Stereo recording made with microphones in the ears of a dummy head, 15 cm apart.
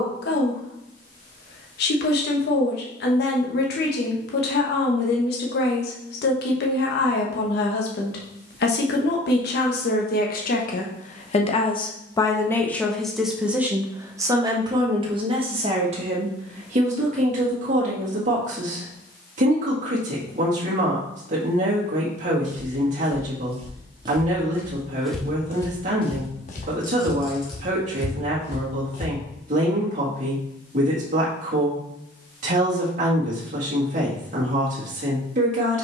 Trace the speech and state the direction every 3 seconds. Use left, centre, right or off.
left, left, left, left, centre, right, right, right, right, right, right, right.